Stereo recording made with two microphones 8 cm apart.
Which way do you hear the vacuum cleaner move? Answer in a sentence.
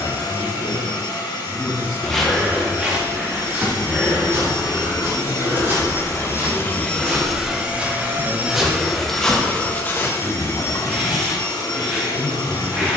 In this clip you hear the vacuum cleaner go right and come back.